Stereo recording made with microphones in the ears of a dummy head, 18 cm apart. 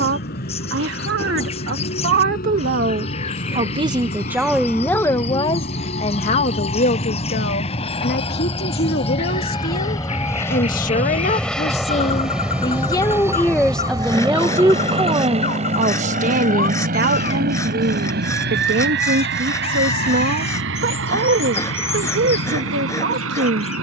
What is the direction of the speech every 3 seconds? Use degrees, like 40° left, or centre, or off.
60° right, centre, 50° left, 40° left, 10° left, 40° right, 60° right, 60° right.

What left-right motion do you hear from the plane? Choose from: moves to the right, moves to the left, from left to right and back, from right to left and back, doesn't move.
moves to the right.